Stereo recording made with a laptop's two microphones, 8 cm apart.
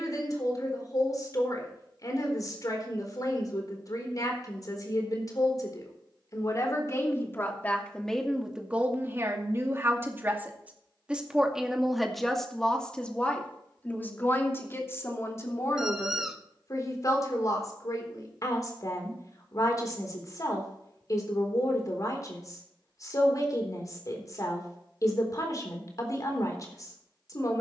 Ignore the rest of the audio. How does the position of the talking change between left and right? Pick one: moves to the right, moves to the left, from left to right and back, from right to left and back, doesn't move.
from left to right and back.